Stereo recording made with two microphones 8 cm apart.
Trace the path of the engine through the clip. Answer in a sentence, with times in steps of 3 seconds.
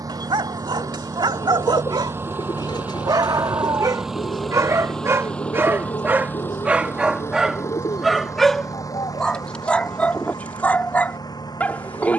You can hear the engine on the right from 0 s, in the centre from 3 s and on the left from 6 s.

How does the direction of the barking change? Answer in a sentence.
You can hear the barking move to the left.